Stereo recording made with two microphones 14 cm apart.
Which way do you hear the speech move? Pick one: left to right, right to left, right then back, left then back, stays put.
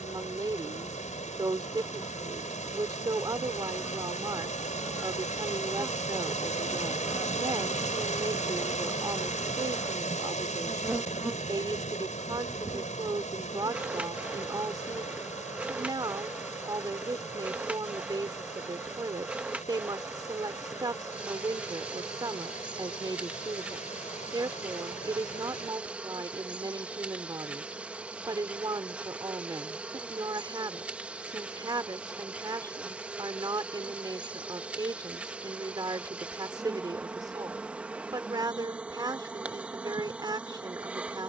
stays put.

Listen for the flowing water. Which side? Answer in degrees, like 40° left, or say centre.
60° left.